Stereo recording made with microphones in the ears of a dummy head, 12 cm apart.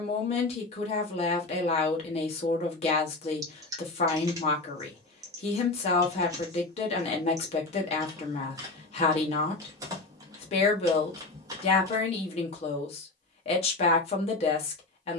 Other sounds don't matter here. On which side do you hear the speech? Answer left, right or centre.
left.